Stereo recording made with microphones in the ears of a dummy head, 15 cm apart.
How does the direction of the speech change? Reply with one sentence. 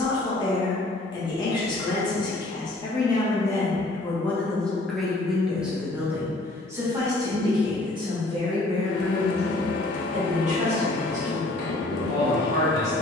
In this clip you hear the speech move to the right.